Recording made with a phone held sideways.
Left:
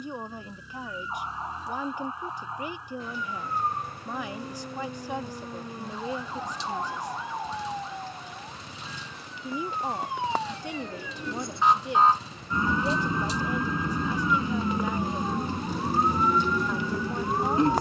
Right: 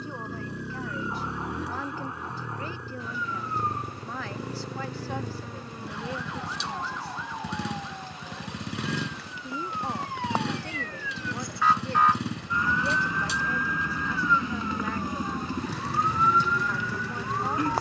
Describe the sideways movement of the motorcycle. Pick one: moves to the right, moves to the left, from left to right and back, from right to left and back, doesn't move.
doesn't move.